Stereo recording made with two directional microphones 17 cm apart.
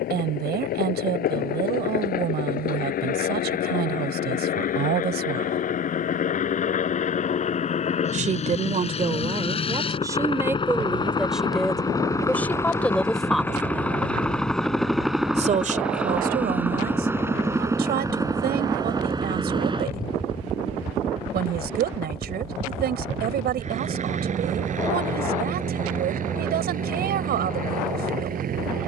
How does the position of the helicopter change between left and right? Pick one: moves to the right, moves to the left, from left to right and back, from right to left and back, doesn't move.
moves to the right.